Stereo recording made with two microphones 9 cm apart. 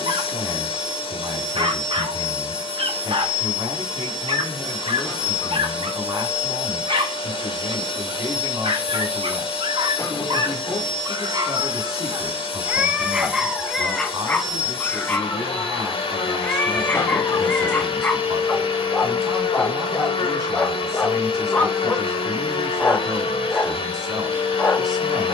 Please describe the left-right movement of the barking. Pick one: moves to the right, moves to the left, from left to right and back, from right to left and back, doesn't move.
moves to the left.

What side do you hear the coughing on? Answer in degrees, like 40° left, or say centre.
40° left.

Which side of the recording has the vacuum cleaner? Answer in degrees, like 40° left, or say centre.
80° left.